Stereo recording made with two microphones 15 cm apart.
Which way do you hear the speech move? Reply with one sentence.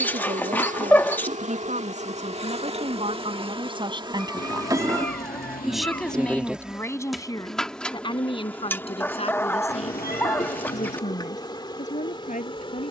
In this clip you hear the speech travel towards the left.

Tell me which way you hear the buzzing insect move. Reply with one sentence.
You can hear the buzzing insect move to the left.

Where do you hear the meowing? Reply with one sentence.
In this clip you hear the meowing on the left.